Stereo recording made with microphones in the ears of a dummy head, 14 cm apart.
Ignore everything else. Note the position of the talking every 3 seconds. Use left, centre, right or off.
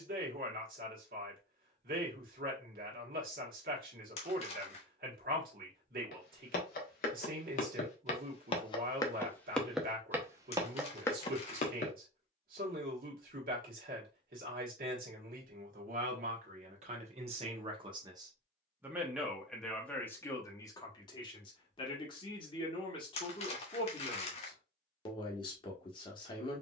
right, right, right, right, right, right, centre, left, left.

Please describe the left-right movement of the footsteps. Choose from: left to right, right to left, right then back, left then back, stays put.
right then back.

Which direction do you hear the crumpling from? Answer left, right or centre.
left.